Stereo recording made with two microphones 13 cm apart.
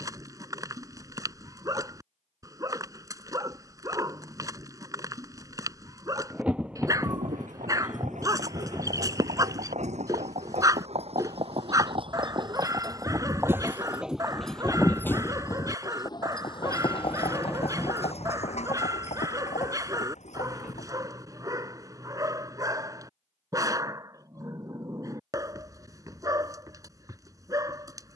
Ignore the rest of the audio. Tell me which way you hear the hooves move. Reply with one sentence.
In this clip you hear the hooves move to the left.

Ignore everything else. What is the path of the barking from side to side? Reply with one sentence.
You can hear the barking stay in one place.